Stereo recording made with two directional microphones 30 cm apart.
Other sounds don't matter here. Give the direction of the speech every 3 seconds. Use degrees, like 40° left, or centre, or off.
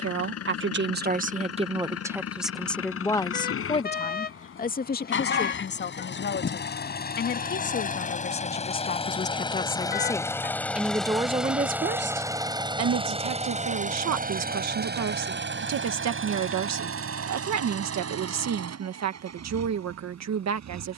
20° right, 30° left, 40° left, centre, 60° right, 60° right, 60° right.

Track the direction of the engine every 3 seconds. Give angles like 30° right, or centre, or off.
50° left, 40° left, 30° left, 10° left, 20° right, 40° right, 60° right.